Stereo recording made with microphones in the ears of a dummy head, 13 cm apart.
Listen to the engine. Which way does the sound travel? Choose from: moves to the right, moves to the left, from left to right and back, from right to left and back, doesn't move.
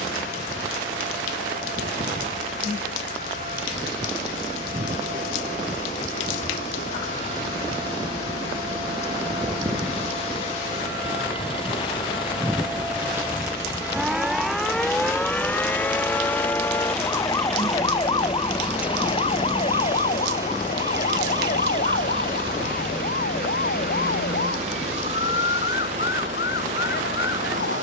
moves to the right.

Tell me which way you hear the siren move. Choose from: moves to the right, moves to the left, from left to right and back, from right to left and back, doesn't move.
moves to the left.